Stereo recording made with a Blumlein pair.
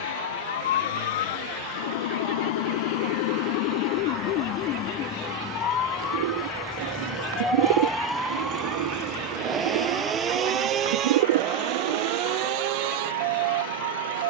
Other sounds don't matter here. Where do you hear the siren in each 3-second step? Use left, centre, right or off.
left, left, centre, right, right.